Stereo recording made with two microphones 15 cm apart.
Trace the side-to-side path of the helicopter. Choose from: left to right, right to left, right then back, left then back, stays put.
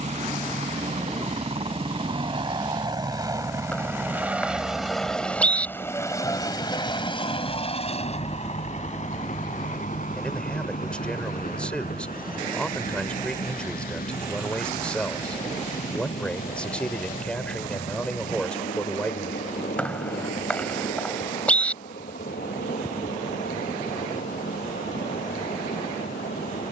right to left.